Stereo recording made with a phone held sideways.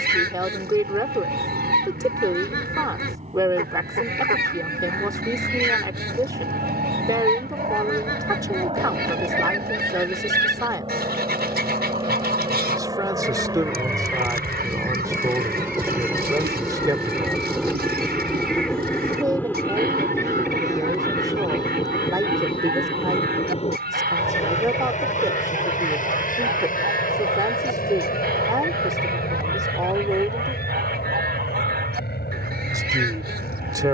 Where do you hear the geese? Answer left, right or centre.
right.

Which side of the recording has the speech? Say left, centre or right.
right.